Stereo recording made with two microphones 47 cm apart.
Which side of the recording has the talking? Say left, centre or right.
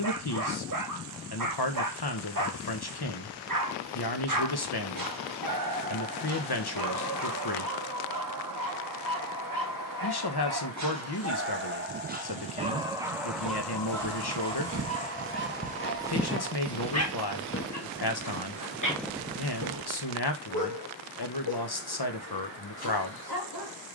left.